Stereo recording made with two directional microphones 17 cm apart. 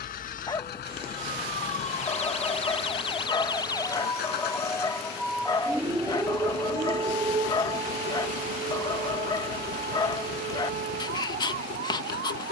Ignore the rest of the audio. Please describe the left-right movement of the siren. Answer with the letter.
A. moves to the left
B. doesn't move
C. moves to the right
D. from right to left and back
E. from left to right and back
C.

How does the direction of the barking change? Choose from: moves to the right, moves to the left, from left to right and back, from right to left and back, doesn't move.
doesn't move.